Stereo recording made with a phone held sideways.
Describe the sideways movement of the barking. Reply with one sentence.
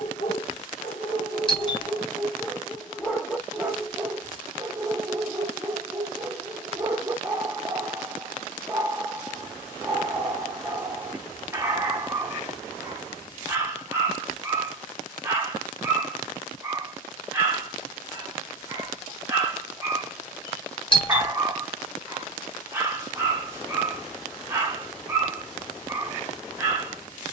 You can hear the barking travel towards the right.